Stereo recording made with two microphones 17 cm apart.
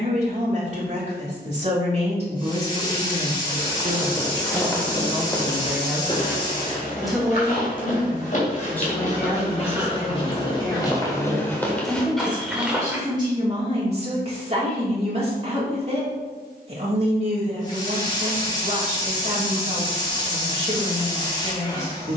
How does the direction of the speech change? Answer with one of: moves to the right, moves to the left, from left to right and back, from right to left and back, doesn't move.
from right to left and back.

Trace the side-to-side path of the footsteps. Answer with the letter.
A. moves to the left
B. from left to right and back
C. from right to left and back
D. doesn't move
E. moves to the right
C.